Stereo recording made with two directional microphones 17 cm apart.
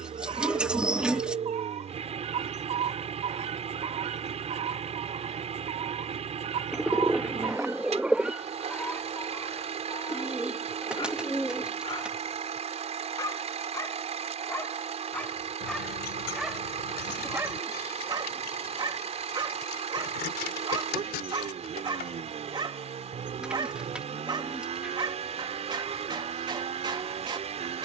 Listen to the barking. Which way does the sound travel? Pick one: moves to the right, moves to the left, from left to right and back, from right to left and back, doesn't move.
from right to left and back.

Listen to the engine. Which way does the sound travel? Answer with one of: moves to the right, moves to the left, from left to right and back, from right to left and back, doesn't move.
doesn't move.